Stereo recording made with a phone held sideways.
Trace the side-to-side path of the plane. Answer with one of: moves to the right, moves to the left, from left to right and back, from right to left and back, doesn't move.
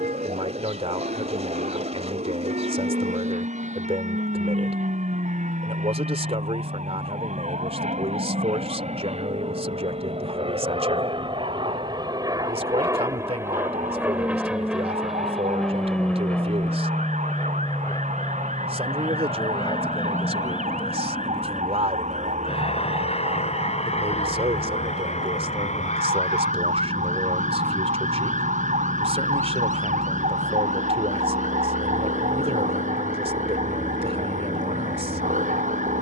moves to the left.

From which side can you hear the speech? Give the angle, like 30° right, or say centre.
40° right.